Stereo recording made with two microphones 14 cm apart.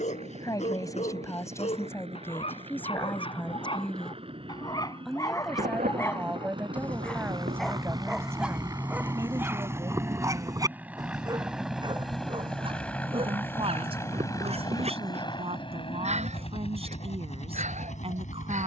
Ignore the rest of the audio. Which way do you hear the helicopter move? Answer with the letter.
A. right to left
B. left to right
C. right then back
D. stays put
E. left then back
A.